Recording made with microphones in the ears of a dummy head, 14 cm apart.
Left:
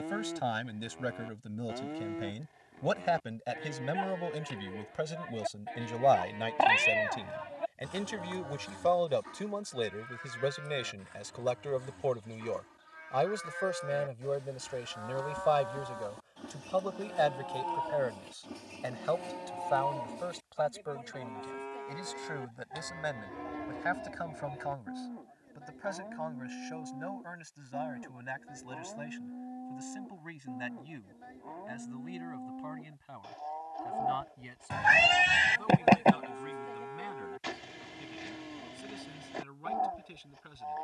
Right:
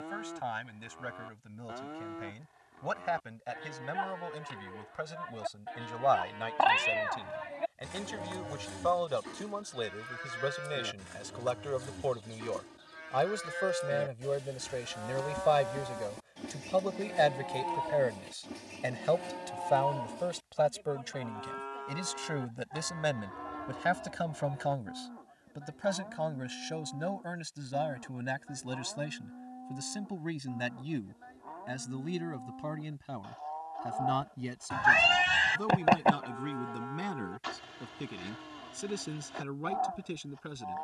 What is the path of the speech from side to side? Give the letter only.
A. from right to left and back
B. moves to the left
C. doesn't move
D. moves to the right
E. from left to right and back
D.